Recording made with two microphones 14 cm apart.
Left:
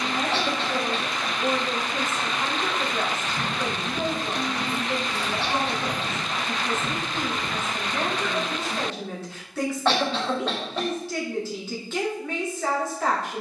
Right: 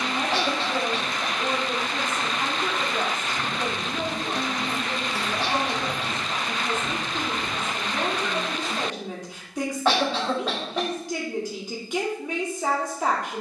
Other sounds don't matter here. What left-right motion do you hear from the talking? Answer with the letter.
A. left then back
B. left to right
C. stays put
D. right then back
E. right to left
C.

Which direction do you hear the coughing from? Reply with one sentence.
You can hear the coughing in the centre.